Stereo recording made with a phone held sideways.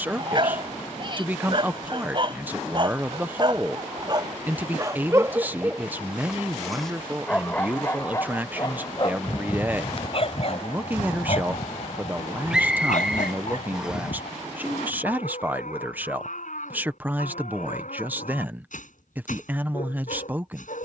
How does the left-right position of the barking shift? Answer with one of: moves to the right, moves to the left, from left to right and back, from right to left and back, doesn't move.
moves to the left.